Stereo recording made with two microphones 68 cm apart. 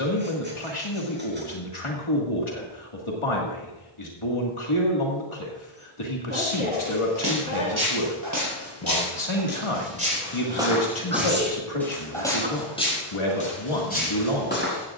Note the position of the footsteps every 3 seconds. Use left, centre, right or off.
off, off, right, centre, centre.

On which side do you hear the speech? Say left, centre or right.
left.